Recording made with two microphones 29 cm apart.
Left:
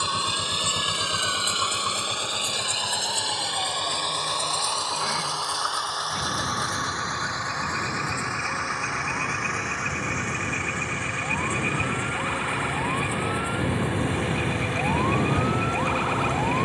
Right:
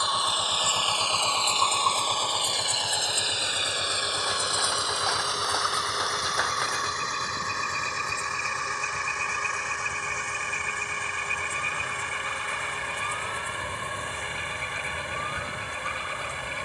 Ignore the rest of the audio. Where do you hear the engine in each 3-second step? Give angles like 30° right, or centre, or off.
20° left, 20° right, 40° right, 50° right, 50° right, 60° right.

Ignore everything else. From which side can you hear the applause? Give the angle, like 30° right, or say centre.
70° right.